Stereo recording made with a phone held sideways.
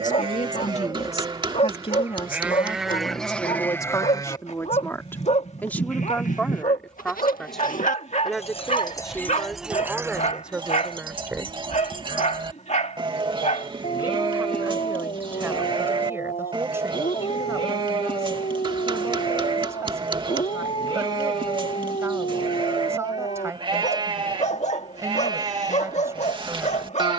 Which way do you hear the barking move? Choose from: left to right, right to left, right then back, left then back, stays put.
stays put.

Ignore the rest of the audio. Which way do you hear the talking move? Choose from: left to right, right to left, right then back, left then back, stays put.
left to right.